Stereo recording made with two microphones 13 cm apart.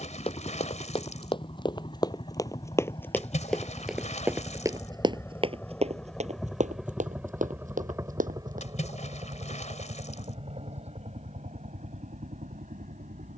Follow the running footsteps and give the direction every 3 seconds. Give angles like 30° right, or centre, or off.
40° left, 20° right, 70° right, off, off.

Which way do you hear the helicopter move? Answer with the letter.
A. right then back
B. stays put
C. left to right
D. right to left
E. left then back
C.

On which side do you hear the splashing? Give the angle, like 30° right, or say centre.
60° left.